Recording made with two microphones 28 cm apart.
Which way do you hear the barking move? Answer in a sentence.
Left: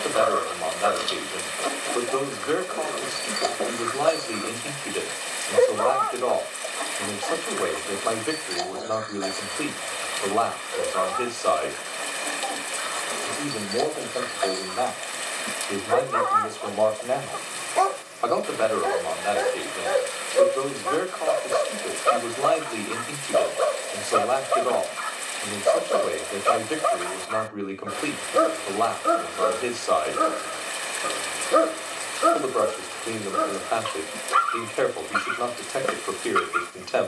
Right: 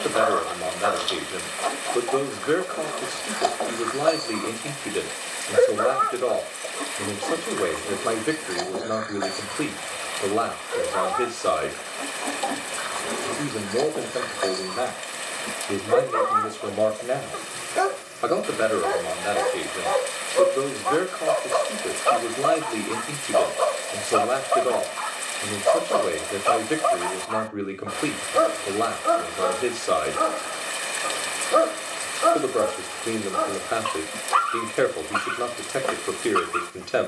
You can hear the barking move from left to right and back again.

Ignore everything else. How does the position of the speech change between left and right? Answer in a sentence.
You can hear the speech stay put.